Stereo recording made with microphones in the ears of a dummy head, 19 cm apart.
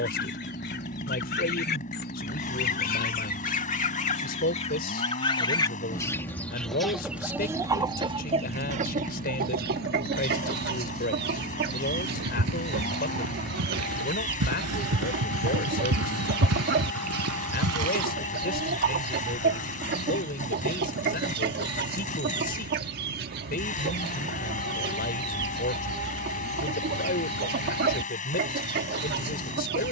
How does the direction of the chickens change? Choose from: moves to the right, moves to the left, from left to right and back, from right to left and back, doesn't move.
moves to the right.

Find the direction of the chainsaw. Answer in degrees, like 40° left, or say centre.
40° left.